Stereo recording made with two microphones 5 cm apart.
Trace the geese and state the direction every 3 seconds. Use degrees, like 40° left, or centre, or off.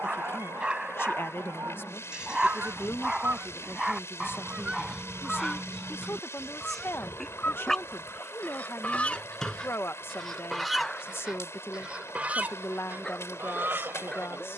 60° right, 20° right, 30° left, centre, 50° right.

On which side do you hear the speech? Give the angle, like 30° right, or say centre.
60° left.